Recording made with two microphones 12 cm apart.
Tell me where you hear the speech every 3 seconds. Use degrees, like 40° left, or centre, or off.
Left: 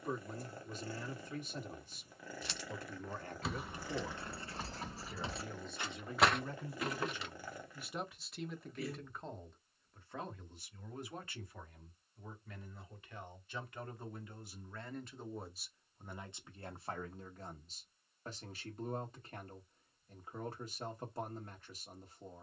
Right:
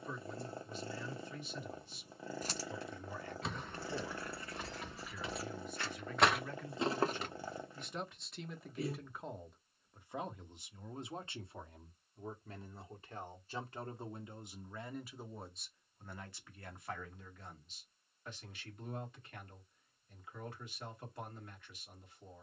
40° left, 40° left, 10° left, 20° right, 30° right, 20° left, 40° left, 40° left.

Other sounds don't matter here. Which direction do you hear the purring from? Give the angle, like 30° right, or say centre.
30° right.